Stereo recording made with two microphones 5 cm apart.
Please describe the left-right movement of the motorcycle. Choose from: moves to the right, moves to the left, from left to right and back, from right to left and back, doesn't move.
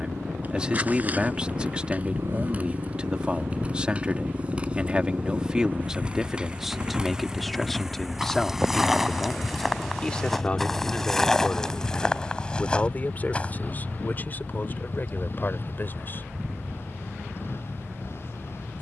moves to the left.